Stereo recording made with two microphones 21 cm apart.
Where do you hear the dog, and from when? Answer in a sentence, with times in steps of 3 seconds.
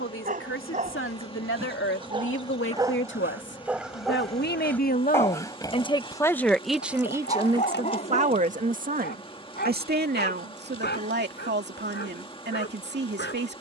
In this clip you hear the dog on the right from 0 s, in the centre from 3 s and on the left from 6 s.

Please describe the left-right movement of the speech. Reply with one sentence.
You can hear the speech move from left to right.